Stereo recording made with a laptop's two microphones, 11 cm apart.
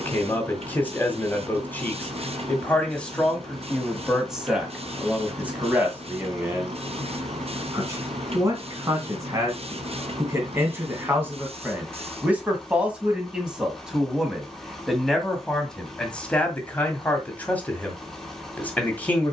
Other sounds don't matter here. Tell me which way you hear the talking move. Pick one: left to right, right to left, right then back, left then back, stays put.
right then back.